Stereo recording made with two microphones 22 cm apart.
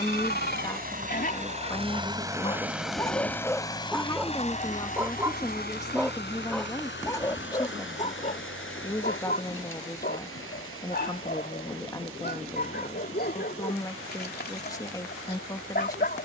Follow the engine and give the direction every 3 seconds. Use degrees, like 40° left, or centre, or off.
30° right, 30° left, 60° left, 70° left, 70° left, 80° left.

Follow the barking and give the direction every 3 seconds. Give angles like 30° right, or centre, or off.
40° left, centre, 20° left, 50° left, 50° left, 50° left.